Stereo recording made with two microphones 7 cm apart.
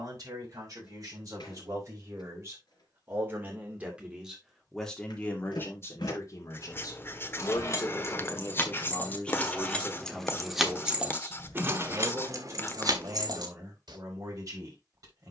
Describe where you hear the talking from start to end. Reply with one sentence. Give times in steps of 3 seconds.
You can hear the talking on the right from 0 s, in the centre from 3 s, on the left from 6 s, in the centre from 9 s and on the right from 12 s.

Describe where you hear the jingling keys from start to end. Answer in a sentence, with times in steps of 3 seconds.
In this clip you hear the jingling keys not at all from 0 s, on the left from 6 s, in the centre from 9 s and on the right from 12 s.